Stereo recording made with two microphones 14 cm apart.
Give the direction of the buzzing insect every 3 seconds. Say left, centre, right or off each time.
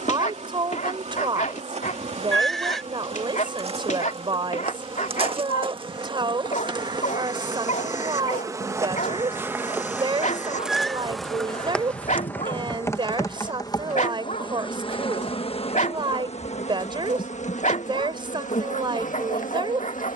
right, right, right, centre, left, left, left.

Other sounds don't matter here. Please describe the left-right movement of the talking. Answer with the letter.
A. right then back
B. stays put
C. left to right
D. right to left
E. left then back
B.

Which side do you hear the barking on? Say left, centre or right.
left.